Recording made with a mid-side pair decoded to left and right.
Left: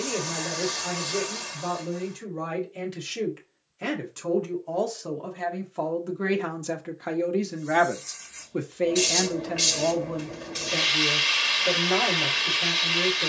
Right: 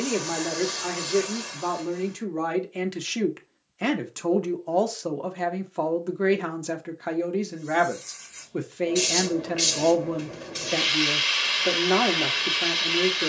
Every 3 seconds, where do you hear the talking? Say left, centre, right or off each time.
right, right, centre, right, right.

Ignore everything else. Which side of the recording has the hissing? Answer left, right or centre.
centre.